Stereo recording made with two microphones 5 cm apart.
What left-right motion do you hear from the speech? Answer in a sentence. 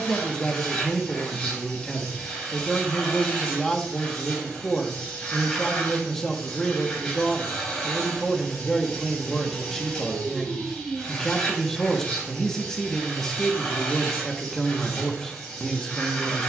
You can hear the speech stay put.